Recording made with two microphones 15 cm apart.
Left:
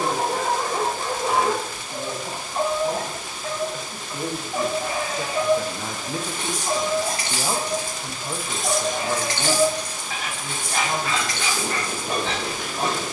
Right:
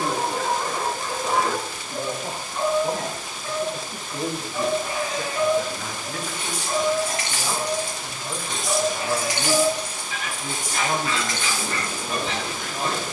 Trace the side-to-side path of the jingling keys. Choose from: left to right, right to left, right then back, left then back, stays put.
left to right.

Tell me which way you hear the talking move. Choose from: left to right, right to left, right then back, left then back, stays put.
left then back.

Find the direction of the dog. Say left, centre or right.
left.